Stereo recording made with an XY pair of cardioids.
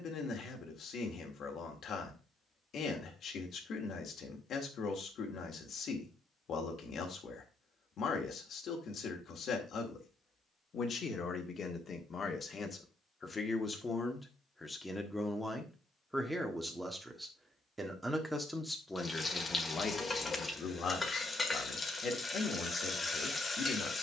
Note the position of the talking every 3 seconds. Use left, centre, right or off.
left, left, left, left, left, centre, left, left.